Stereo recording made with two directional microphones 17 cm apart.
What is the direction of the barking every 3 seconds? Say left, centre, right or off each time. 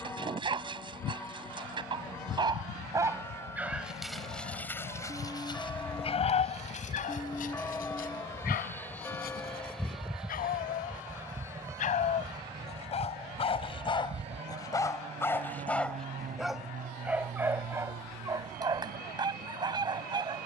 right, centre, left, left, left, centre, right.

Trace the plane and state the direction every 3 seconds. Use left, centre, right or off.
left, left, left, centre, right, right, right.